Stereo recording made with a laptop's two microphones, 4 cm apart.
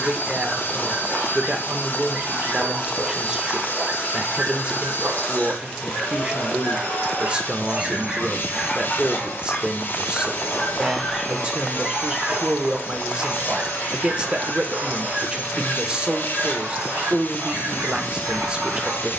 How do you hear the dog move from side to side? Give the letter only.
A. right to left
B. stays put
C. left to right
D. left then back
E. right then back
D.